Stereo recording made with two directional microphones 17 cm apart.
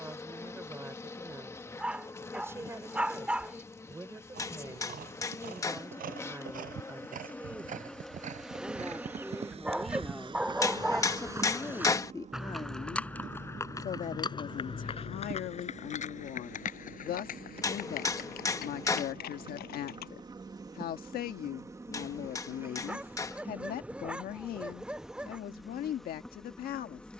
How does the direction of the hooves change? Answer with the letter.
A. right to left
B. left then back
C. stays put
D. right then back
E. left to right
A.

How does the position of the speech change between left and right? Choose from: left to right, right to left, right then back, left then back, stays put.
right to left.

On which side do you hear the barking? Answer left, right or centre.
centre.